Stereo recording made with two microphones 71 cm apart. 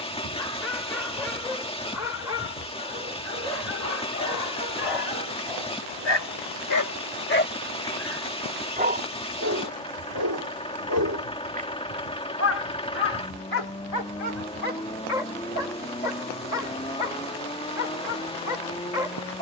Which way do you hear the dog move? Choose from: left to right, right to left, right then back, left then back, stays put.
right then back.